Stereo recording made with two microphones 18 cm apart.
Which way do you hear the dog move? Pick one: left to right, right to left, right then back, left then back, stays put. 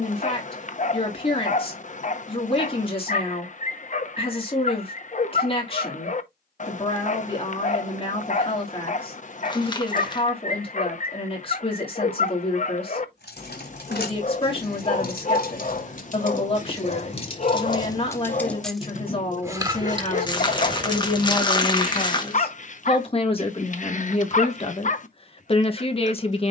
stays put.